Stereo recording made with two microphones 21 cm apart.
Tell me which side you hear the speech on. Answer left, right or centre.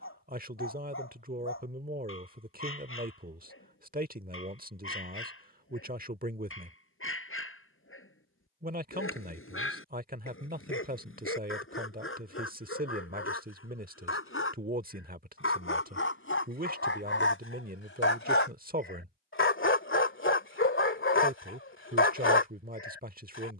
right.